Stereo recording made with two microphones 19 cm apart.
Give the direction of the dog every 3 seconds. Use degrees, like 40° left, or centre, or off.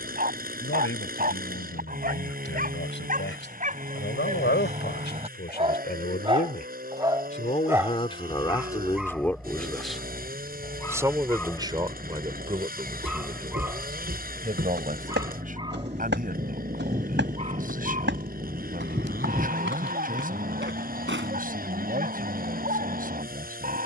50° right, 40° right, 10° right, 10° left, 10° right, 30° right, 40° right, 40° right.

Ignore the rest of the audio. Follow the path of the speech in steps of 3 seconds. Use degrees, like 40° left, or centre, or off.
80° left, 60° left, 30° left, 10° right, 30° right, 50° right, 50° right, 50° right.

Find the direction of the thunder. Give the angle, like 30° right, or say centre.
30° right.